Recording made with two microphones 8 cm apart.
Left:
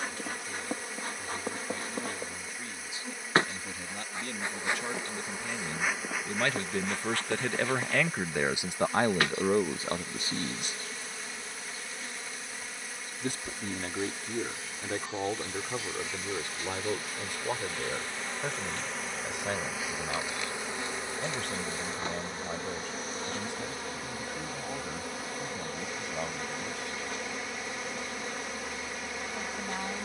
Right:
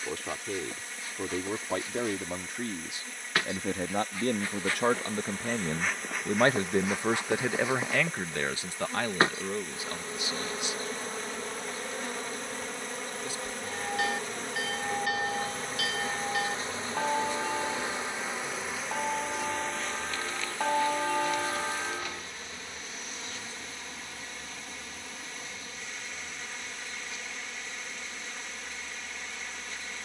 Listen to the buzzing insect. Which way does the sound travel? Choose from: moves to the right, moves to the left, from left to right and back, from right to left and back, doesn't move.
from left to right and back.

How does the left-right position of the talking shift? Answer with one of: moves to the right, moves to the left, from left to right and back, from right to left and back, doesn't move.
moves to the left.